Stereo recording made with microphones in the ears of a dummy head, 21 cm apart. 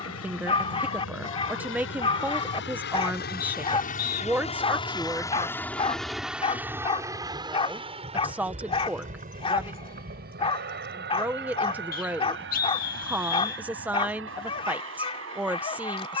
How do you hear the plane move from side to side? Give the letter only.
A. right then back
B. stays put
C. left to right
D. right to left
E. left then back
C.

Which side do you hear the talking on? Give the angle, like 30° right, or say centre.
10° right.